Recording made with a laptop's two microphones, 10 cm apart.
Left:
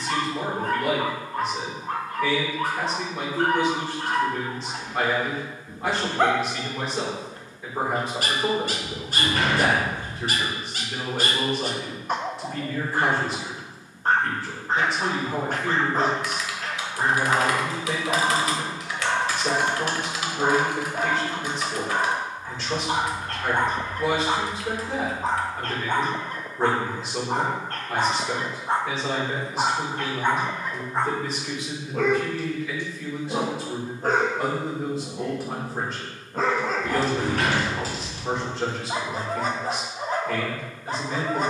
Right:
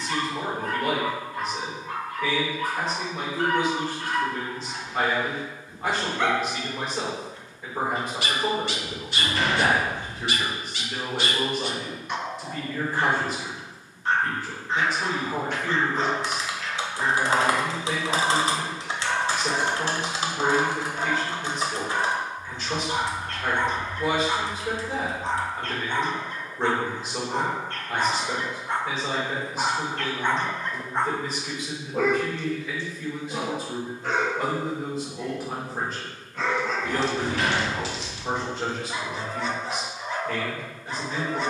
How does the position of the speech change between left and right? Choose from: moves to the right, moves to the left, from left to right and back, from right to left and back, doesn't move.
doesn't move.